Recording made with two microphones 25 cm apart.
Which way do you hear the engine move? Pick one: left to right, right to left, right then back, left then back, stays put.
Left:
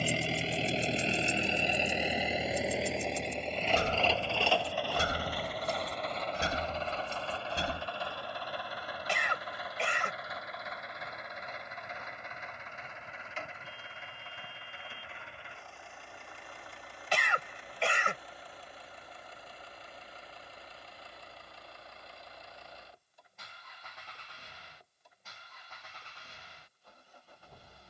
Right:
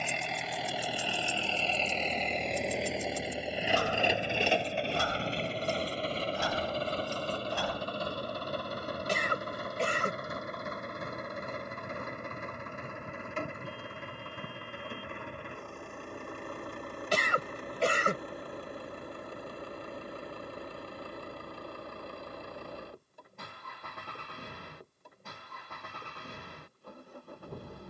left to right.